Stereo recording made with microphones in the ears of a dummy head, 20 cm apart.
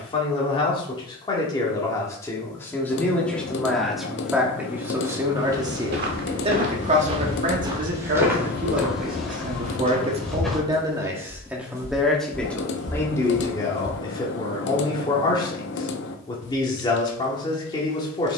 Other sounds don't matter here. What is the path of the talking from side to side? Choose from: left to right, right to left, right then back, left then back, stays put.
right then back.